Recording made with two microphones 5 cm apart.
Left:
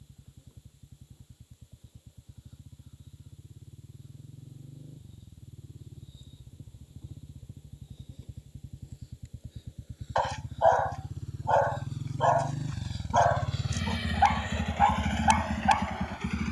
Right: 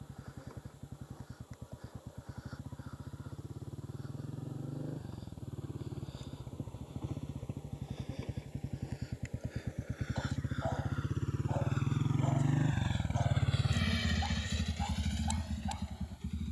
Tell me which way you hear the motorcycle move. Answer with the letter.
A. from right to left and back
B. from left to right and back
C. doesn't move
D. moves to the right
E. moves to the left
E.